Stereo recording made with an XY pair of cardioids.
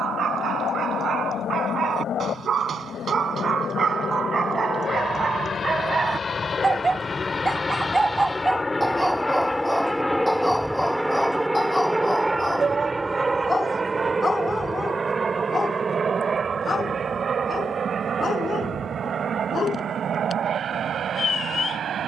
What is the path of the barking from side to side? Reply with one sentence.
You can hear the barking move to the left.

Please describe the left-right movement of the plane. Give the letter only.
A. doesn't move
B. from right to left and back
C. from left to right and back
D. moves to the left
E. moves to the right
E.